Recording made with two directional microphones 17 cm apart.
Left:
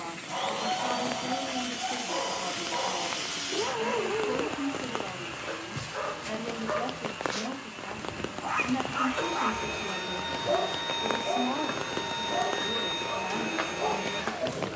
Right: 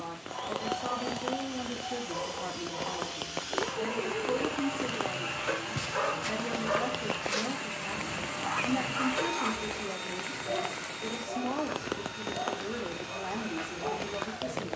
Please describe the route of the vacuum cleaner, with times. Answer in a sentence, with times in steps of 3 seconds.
In this clip you hear the vacuum cleaner on the left from 0 s, in the centre from 3 s, on the right from 6 s and on the left from 9 s.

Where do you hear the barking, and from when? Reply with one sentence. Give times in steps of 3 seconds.
You can hear the barking on the left from 0 s, in the centre from 6 s and on the left from 9 s.